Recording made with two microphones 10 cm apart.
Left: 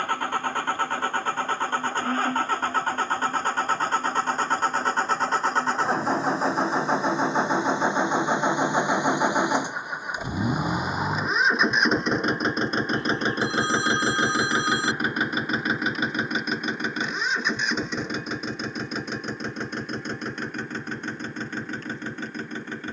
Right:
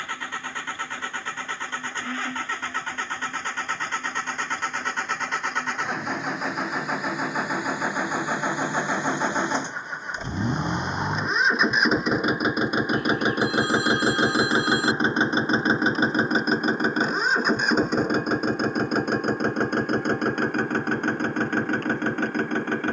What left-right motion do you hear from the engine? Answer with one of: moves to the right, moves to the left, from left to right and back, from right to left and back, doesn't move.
moves to the right.